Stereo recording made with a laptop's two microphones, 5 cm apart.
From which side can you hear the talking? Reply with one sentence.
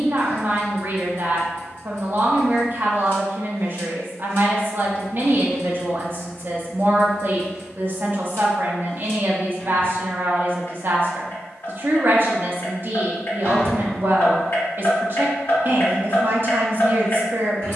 In this clip you hear the talking on the right.